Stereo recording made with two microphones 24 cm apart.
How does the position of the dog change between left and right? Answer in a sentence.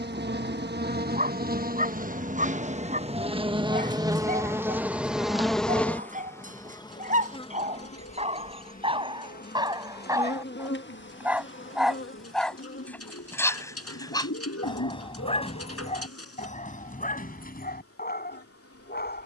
In this clip you hear the dog go from the right side to the left.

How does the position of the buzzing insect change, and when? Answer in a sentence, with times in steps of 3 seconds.
You can hear the buzzing insect on the right from 0 s, in the centre from 3 s and on the left from 6 s.